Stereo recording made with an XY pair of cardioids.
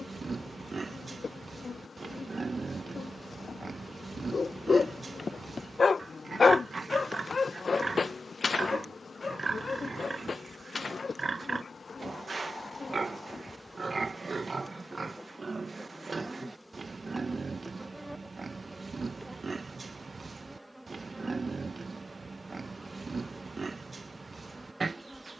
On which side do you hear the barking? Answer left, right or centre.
left.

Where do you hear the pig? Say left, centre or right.
right.